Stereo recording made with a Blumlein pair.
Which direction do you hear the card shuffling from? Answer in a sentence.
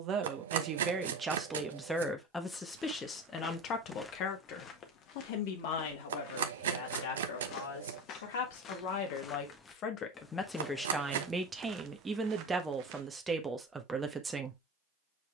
In this clip you hear the card shuffling on the right.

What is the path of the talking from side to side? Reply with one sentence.
In this clip you hear the talking move from right to left and back again.